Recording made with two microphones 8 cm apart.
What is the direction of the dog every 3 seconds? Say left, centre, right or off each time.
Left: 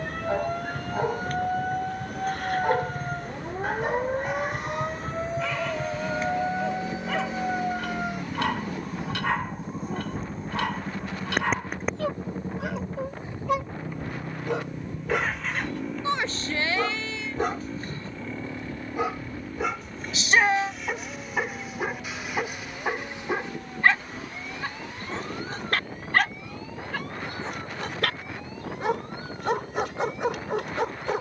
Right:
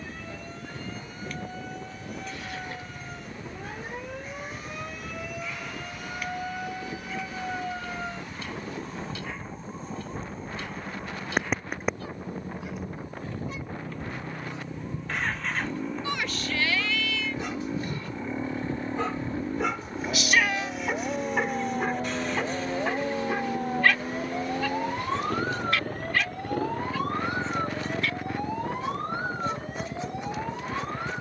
left, left, left, left, left, left, centre, centre, left, left, left.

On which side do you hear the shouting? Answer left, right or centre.
left.